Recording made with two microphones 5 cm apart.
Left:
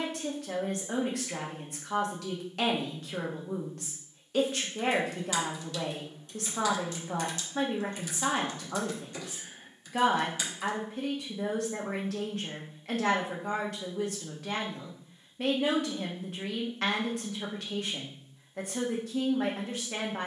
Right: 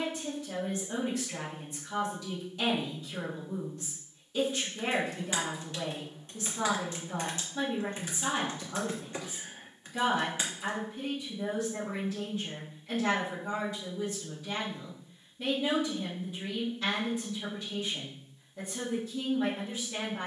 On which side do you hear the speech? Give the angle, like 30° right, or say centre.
70° left.